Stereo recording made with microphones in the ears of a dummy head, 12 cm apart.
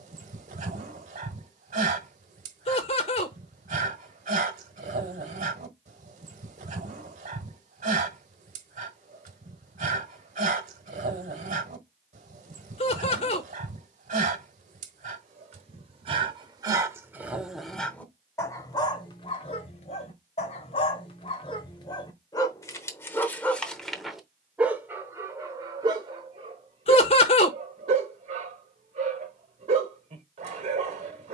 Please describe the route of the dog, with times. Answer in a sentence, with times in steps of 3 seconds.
In this clip you hear the dog on the right from 0 s, on the left from 18 s and on the right from 24 s.